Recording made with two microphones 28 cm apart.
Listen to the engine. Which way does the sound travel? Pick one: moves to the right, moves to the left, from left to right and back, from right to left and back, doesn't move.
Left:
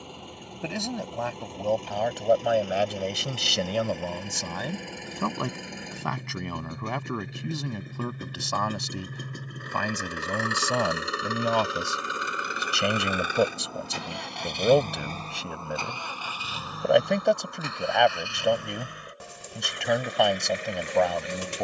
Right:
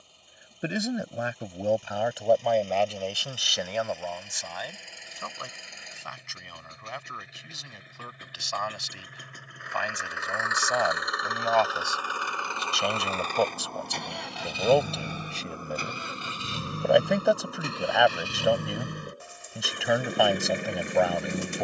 moves to the right.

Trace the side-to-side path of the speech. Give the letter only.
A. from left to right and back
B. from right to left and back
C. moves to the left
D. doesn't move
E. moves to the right
B.